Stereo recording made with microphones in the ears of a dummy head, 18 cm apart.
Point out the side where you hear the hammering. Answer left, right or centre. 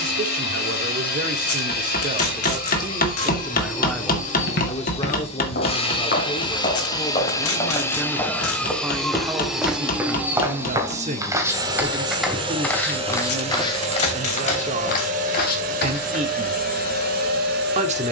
left.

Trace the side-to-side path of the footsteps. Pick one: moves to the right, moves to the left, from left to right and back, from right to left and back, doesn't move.
from left to right and back.